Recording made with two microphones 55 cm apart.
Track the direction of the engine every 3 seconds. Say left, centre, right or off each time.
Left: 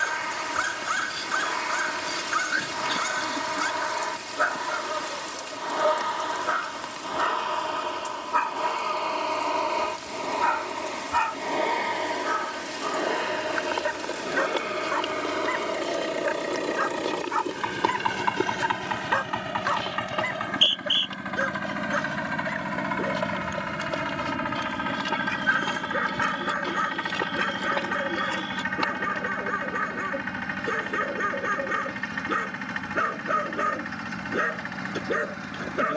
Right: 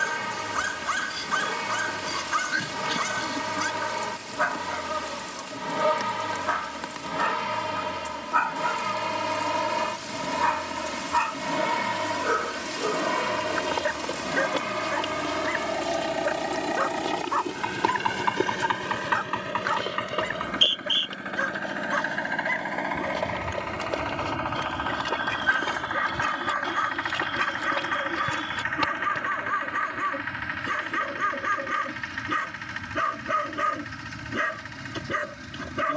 right, right, right, right, right, centre, centre, left, left, left, left, left.